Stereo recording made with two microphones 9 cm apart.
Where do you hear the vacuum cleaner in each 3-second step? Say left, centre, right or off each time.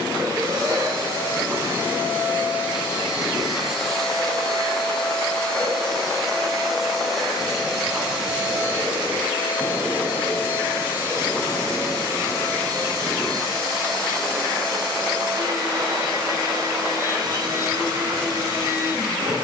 right, centre, centre, right, right, right, right.